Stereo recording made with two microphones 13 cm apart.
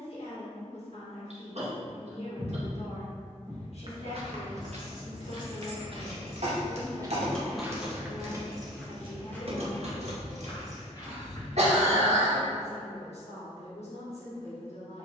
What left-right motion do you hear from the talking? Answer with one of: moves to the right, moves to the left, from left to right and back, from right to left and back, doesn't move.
doesn't move.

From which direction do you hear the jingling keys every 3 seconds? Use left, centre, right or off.
off, left, centre, right, off.